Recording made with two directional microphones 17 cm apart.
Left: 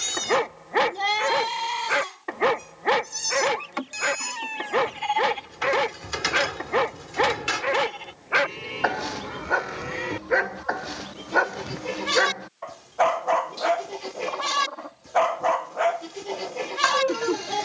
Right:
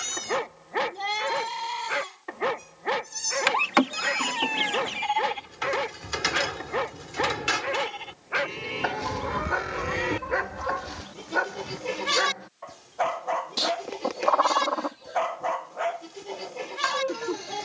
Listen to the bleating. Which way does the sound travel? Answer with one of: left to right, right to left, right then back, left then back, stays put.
right then back.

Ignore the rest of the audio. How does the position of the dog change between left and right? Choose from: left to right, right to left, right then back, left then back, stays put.
stays put.